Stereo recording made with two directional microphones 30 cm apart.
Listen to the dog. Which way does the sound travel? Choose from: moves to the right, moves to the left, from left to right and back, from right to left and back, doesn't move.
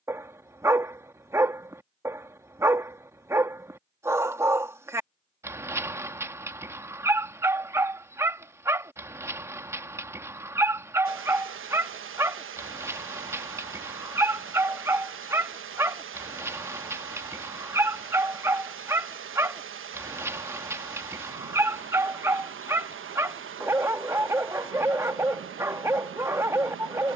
doesn't move.